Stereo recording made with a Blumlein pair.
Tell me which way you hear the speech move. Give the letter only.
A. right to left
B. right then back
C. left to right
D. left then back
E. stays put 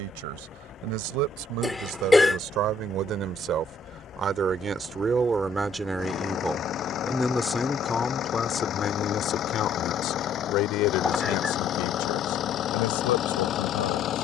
A.